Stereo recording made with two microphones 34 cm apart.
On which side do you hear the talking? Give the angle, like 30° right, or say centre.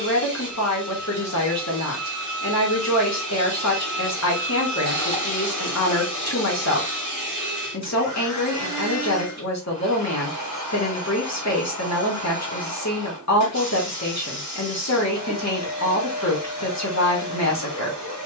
50° left.